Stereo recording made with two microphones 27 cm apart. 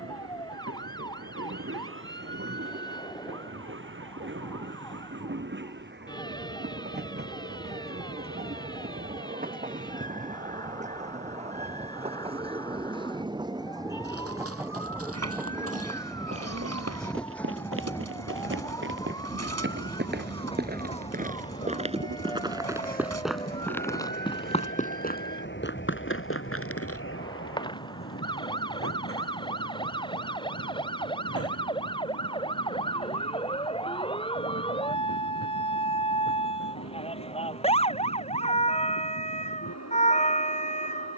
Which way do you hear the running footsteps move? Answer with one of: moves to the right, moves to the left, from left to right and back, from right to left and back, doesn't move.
moves to the left.